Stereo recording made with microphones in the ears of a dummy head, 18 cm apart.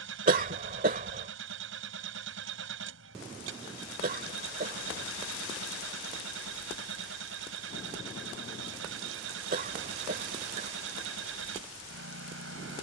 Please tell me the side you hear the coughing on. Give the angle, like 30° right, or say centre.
40° right.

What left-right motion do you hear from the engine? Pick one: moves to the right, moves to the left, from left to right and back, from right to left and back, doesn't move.
doesn't move.